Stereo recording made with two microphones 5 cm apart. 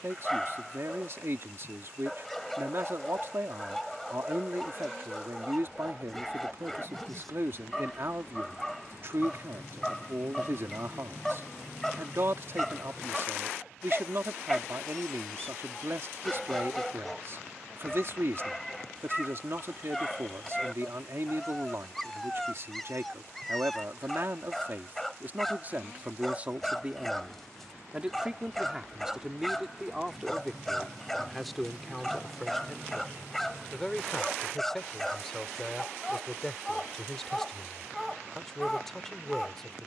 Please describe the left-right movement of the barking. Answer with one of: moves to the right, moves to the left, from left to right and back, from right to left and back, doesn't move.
doesn't move.